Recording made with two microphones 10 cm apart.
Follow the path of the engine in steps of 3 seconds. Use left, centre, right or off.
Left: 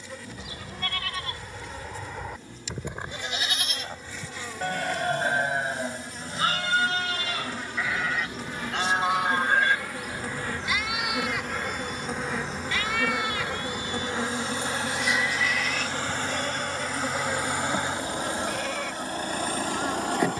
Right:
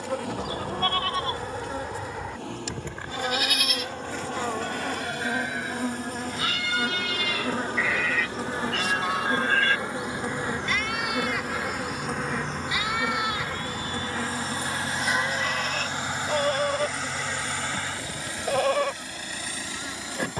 right, right, right, right, right, centre, left.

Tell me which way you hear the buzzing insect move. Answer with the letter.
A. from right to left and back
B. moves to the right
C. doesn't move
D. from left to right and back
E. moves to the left
E.